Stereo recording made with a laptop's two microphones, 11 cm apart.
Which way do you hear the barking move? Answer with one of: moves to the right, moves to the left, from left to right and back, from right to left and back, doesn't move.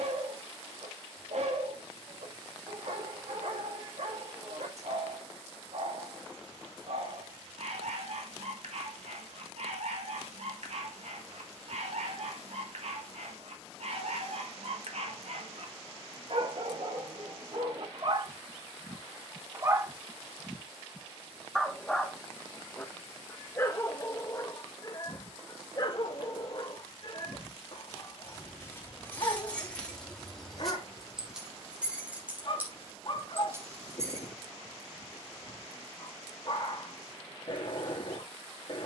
moves to the left.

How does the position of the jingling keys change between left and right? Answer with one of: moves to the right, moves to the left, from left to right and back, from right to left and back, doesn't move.
moves to the right.